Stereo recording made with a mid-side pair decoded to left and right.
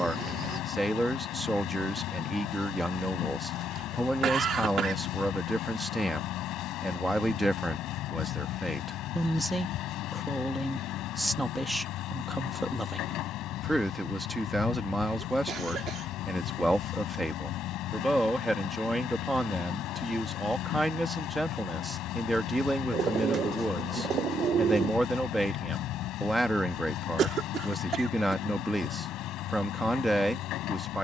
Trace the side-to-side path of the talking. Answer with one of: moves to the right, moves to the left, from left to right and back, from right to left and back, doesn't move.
doesn't move.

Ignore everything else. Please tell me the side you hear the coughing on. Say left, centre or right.
right.